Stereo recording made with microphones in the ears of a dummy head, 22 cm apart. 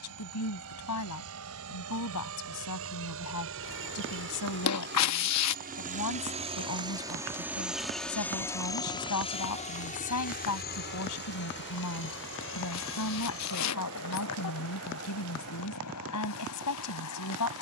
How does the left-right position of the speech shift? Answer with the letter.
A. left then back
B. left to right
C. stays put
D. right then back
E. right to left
C.